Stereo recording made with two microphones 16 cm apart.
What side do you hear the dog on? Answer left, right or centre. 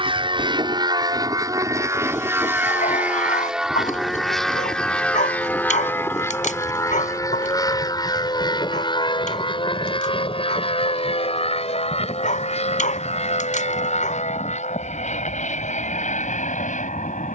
left.